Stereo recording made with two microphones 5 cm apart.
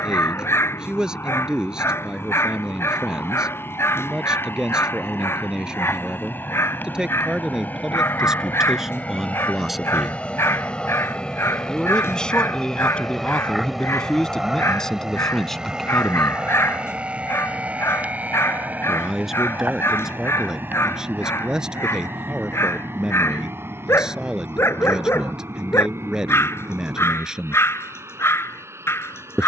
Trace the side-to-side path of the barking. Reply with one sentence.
You can hear the barking stay put.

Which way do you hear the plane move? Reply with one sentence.
You can hear the plane travel towards the right.